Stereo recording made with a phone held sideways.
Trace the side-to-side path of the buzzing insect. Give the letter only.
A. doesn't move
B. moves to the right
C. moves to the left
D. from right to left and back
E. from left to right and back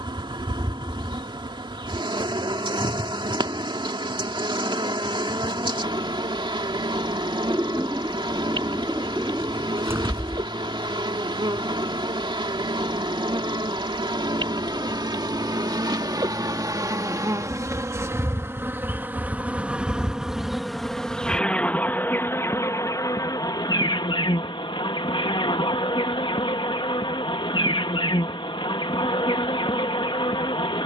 C.